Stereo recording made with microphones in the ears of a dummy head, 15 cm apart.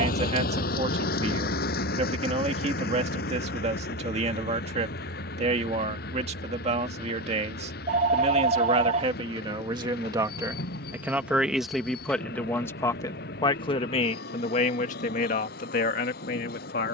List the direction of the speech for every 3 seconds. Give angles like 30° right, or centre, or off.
40° right, 40° right, 40° right, 20° right, 30° left, 50° left.